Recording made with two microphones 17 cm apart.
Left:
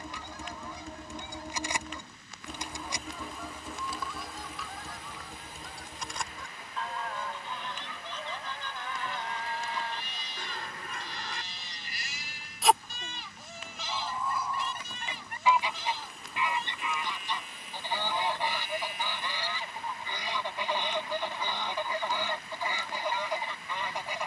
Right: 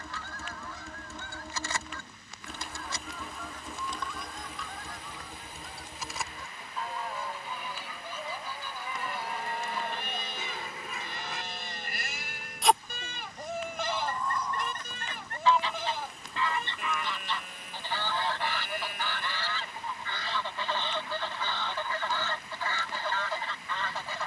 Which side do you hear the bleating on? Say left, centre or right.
right.